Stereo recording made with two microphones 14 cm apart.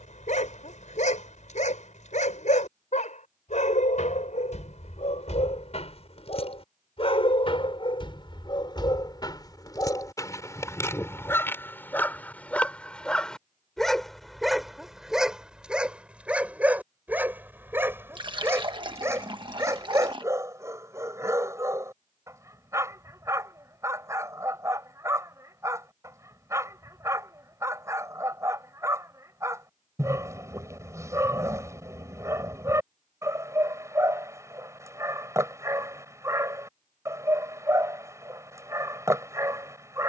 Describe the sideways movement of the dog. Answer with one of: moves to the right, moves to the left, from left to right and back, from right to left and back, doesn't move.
moves to the right.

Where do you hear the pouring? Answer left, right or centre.
right.